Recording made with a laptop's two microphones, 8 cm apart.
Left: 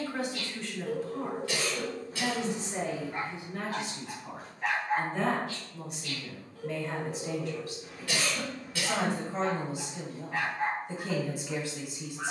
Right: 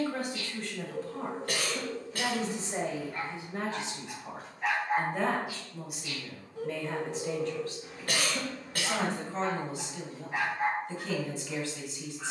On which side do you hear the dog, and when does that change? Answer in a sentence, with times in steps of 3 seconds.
In this clip you hear the dog on the left from 0 s, in the centre from 3 s, on the right from 6 s and in the centre from 9 s.